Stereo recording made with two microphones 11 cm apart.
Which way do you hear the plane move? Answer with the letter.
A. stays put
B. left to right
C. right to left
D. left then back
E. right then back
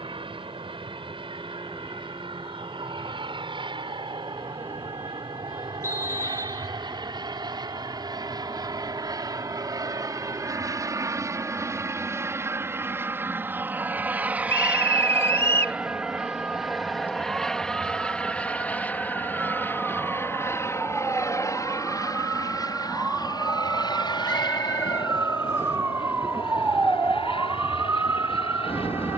C.